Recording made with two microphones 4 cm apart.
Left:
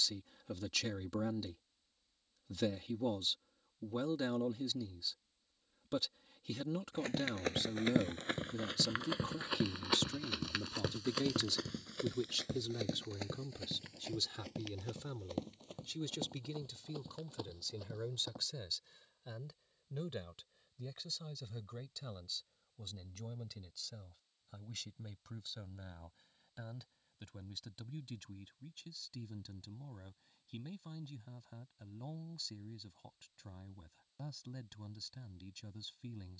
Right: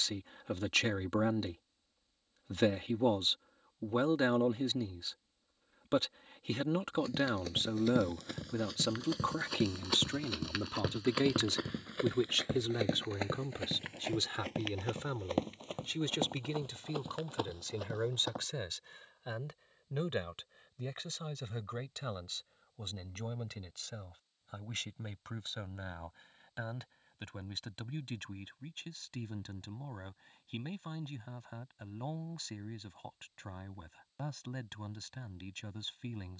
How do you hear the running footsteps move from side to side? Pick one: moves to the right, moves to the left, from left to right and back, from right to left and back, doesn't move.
moves to the right.